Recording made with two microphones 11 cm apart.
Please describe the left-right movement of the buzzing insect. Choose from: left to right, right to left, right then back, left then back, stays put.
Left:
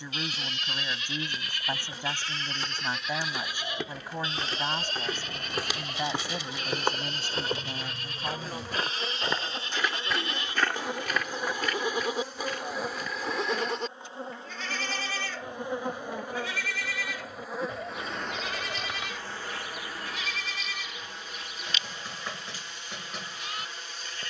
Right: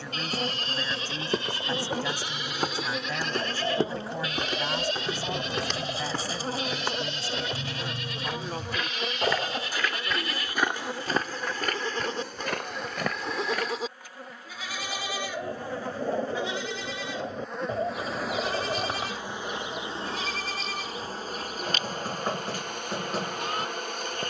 left then back.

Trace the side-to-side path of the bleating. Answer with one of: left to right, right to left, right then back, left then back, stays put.
left then back.